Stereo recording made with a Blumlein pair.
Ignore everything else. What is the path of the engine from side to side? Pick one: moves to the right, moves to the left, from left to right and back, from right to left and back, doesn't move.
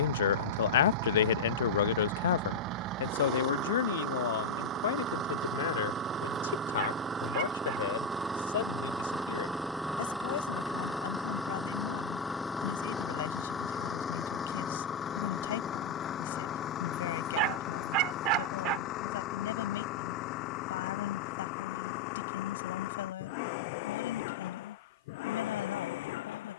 moves to the left.